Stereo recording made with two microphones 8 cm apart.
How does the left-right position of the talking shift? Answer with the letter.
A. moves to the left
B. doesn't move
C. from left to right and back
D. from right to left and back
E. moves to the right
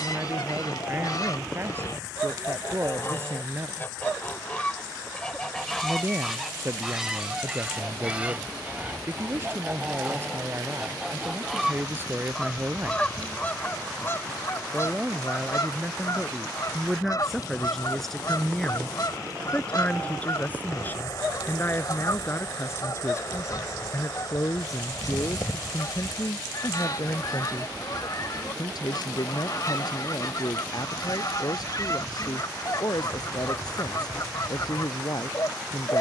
A.